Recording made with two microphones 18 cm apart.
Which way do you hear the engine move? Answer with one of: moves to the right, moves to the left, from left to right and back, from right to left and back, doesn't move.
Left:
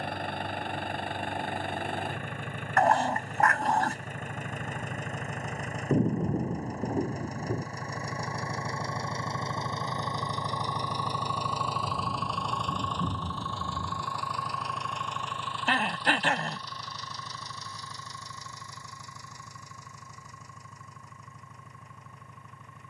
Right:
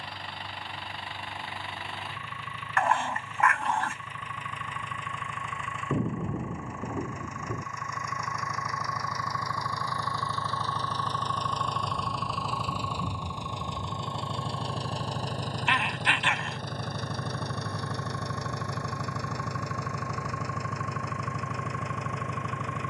moves to the right.